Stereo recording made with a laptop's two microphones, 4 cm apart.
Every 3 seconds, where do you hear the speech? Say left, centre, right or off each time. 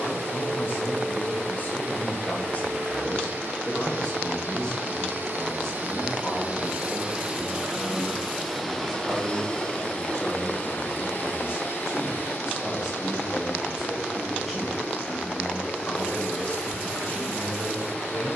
left, left, centre, centre, centre, left.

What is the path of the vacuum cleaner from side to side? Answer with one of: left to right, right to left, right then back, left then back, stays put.
right to left.